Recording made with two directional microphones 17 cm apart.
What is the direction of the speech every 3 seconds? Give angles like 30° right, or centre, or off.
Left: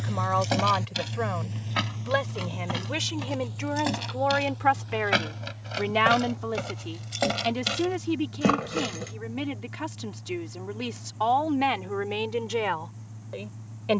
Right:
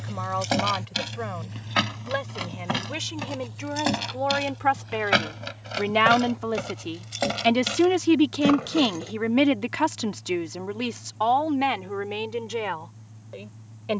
20° left, centre, 40° right, 30° right, 10° left.